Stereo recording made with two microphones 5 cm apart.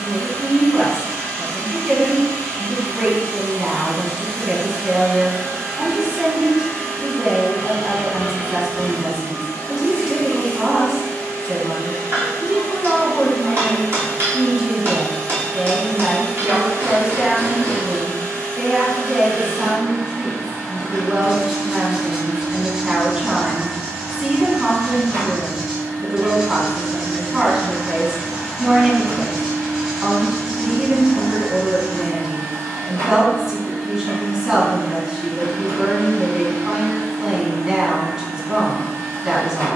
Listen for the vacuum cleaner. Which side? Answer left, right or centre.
right.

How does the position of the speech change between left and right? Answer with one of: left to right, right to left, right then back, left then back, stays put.
stays put.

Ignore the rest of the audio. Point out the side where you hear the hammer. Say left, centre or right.
right.